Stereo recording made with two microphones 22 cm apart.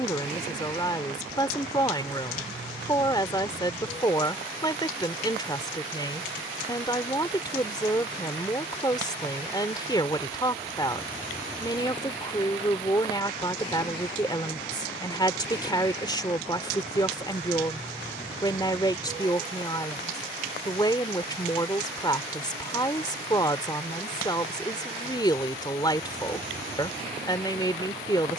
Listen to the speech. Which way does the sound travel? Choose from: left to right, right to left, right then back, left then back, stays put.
stays put.